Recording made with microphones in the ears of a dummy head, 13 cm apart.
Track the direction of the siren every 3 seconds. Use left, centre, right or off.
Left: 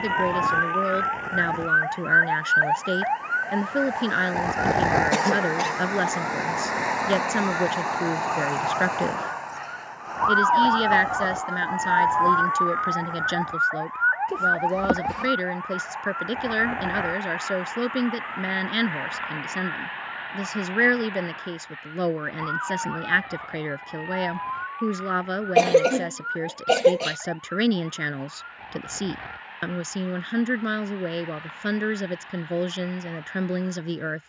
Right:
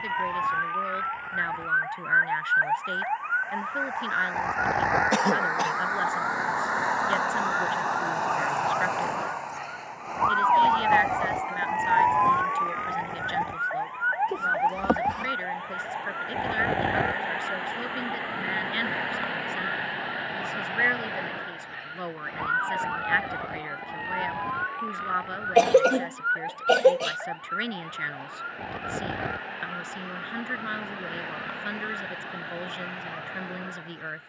left, left, centre, centre, right, right, right, right, right, right, right, right.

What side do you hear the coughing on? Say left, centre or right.
centre.